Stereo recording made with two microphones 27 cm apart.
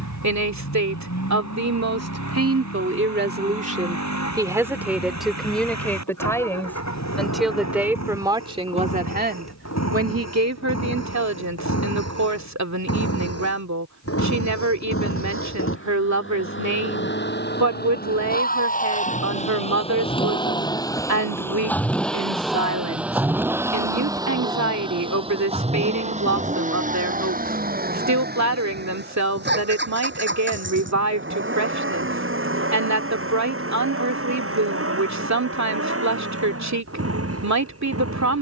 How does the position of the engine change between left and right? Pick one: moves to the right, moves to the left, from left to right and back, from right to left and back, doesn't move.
moves to the right.